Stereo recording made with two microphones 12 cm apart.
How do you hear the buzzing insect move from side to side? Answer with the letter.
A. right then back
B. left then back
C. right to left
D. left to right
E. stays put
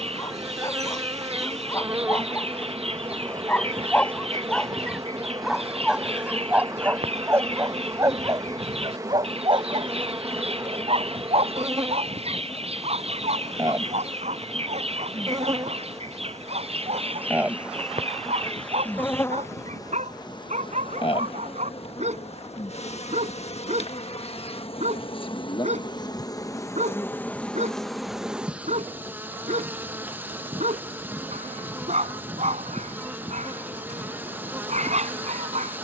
B.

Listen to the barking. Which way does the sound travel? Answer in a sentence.
In this clip you hear the barking travel towards the right.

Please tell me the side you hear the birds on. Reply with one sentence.
You can hear the birds on the right.